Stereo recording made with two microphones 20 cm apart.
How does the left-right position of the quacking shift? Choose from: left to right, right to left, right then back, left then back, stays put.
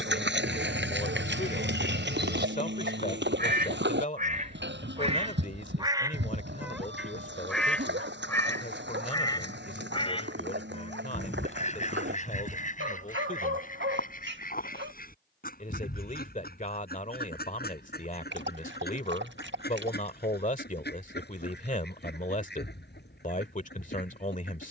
right to left.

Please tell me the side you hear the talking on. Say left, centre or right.
left.